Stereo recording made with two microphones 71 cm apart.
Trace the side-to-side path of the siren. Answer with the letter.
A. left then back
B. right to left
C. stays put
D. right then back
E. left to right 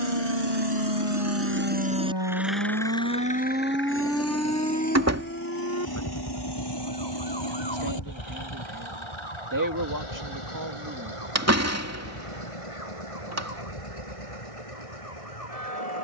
B.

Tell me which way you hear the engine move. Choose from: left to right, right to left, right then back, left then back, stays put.
right to left.